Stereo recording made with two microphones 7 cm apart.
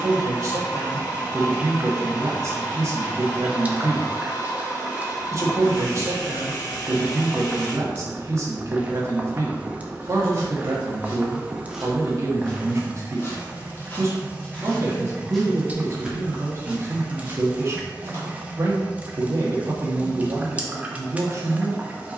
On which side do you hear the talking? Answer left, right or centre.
right.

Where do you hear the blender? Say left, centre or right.
left.